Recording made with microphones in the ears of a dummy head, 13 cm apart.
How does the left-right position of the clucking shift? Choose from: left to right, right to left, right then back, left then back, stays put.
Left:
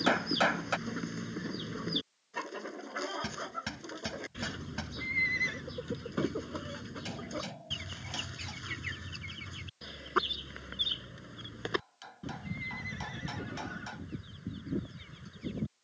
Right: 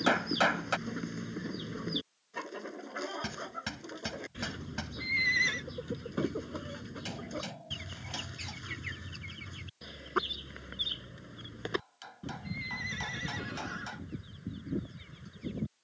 stays put.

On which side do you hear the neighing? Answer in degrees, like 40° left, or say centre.
60° right.